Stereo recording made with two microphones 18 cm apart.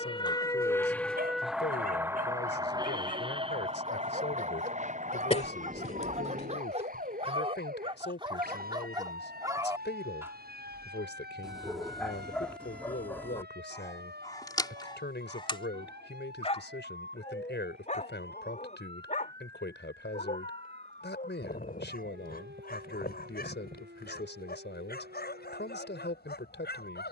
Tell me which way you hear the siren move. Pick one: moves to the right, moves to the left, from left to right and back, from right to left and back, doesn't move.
moves to the right.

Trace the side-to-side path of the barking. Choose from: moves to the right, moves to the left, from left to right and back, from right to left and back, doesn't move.
moves to the left.